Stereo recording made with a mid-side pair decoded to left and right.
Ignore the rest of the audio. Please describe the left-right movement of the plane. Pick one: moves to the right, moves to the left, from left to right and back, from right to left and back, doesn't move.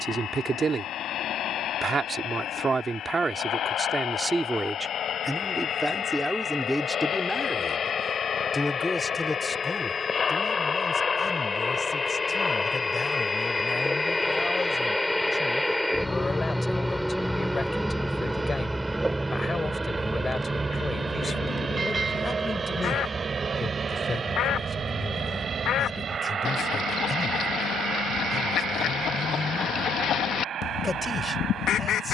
moves to the right.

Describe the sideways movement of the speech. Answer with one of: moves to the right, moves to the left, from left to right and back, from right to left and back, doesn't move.
moves to the left.